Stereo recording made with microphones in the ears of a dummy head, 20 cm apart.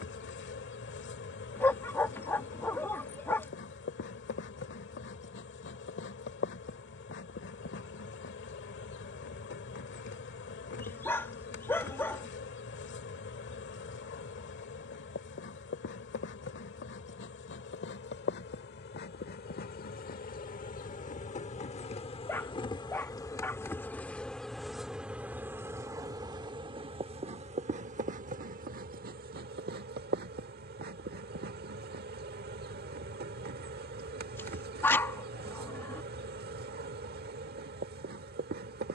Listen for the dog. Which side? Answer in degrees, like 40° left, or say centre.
10° left.